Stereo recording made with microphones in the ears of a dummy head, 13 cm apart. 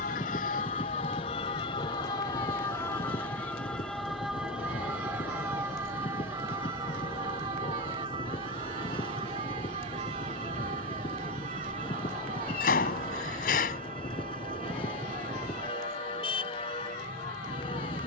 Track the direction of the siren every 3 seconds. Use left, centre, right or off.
left, centre, right, right, right, right.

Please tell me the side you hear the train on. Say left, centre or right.
left.